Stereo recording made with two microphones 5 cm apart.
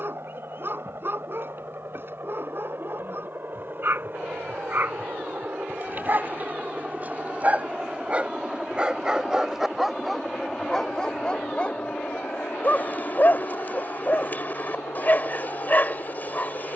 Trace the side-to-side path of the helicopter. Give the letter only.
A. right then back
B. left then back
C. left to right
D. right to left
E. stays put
D.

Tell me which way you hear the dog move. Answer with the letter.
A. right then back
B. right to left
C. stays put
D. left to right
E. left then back
B.